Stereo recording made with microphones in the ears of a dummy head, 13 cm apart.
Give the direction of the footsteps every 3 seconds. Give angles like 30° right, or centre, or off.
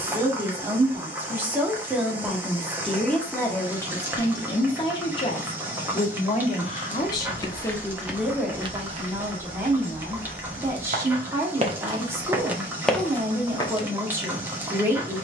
off, off, 10° right, 50° right, 10° left.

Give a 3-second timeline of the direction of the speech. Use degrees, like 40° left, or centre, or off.
10° right, 20° left, 20° left, 20° right, 20° right.